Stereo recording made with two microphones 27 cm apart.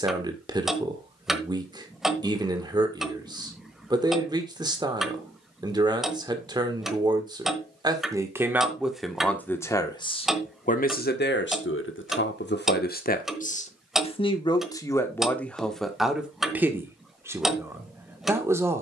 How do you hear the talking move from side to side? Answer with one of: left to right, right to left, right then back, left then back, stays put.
left then back.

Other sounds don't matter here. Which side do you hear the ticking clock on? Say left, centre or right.
centre.